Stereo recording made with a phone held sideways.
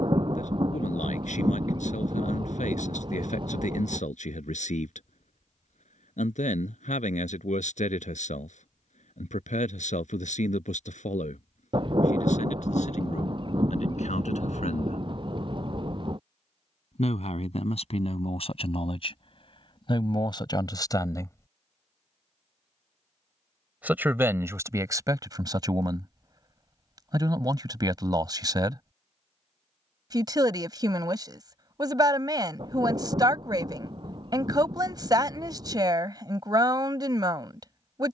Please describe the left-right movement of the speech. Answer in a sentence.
You can hear the speech move from left to right.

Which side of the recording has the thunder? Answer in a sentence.
You can hear the thunder on the right.